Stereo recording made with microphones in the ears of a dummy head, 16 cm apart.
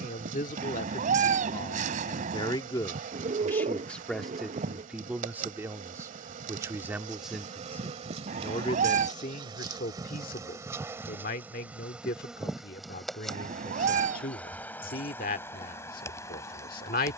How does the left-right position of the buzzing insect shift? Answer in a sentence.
You can hear the buzzing insect move to the left.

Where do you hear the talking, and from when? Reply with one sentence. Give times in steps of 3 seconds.
In this clip you hear the talking on the left from 0 s, in the centre from 3 s and on the left from 9 s.